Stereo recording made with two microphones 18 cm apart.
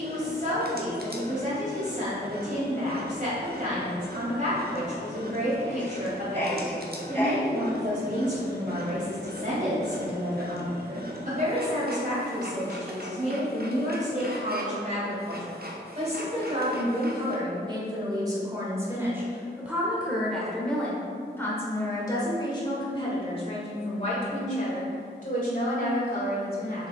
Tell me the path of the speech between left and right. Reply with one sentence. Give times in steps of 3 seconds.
In this clip you hear the speech on the right from 0 s, in the centre from 18 s and on the left from 21 s.